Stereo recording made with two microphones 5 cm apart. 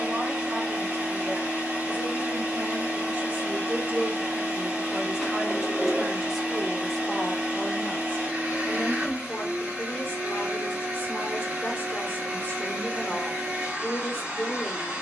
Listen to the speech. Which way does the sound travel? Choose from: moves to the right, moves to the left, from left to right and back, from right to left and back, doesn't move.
moves to the left.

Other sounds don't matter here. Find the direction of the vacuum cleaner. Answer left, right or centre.
right.